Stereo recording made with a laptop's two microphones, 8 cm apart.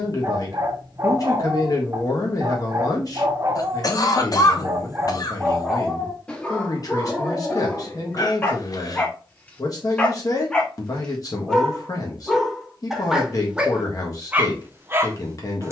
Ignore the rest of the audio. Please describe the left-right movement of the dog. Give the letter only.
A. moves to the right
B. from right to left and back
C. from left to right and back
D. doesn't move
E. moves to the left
B.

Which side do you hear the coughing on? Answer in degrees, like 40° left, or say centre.
50° left.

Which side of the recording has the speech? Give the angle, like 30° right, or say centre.
50° left.